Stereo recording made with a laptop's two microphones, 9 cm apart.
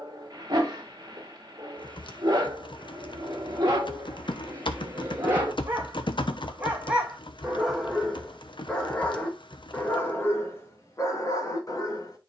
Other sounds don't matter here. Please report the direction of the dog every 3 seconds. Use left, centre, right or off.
right, right, centre, left.